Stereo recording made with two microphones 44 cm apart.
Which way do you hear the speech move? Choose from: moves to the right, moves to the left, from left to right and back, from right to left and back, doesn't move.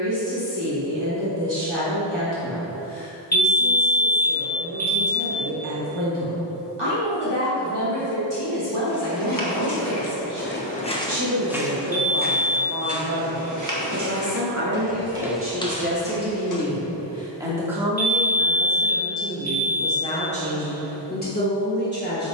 moves to the left.